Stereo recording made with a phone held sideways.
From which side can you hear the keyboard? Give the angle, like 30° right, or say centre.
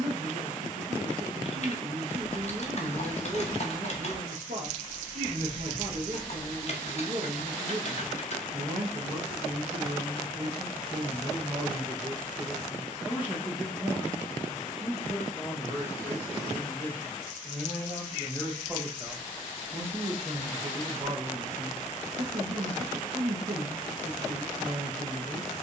50° left.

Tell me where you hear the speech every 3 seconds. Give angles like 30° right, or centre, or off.
60° right, 60° right, 60° right, 40° right, 10° right, 10° left, 30° right, 50° right, 50° right.